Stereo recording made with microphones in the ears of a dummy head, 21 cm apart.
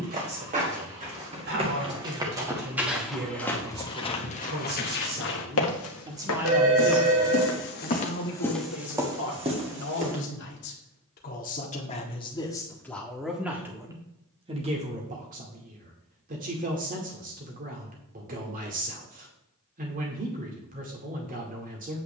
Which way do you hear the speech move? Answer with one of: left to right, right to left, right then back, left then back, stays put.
left then back.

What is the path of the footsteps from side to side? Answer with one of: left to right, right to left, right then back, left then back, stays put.
left then back.